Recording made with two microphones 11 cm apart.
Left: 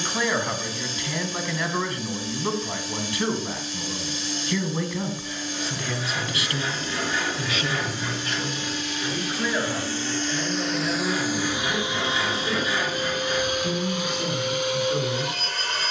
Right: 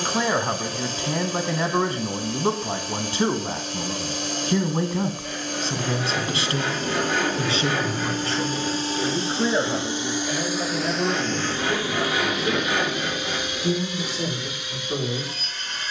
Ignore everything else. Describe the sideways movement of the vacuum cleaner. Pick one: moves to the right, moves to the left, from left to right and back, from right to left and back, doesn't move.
moves to the left.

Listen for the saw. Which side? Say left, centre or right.
right.